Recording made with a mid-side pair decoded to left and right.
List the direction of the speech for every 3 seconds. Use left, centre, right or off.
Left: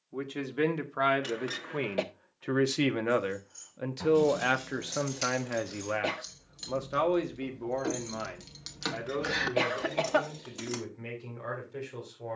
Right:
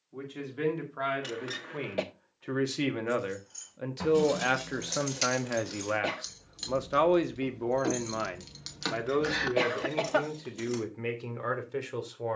left, centre, right, right.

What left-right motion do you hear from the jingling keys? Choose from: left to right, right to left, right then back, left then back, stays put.
right to left.